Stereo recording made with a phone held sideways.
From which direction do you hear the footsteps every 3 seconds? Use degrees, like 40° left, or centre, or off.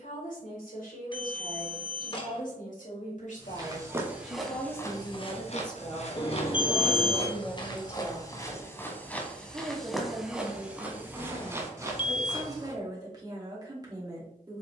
off, 10° left, 30° left, 10° right, 30° right.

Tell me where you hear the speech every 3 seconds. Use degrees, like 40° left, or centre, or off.
70° left, 50° left, centre, 30° right, 30° right.